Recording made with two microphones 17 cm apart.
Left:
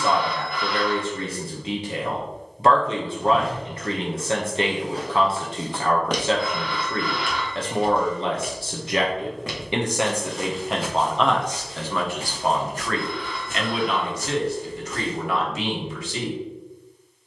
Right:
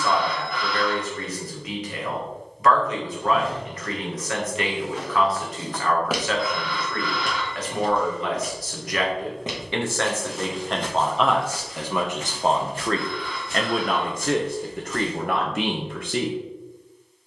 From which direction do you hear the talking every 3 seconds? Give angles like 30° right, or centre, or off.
30° left, 30° left, 30° left, 10° left, 40° right, 60° right.